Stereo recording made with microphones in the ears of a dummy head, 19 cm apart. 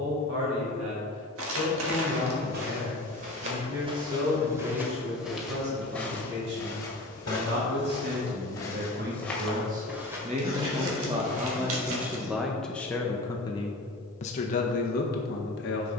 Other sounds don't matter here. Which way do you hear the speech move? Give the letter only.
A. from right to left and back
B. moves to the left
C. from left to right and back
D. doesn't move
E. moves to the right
B.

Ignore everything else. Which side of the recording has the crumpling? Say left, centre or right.
right.